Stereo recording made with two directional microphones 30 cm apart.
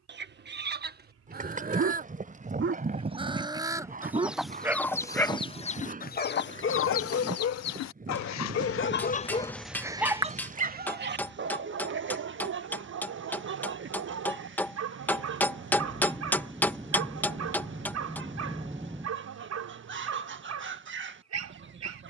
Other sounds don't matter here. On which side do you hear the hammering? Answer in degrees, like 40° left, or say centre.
10° left.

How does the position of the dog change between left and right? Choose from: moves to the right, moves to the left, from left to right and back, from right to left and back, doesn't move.
from right to left and back.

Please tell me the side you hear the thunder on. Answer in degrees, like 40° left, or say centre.
10° right.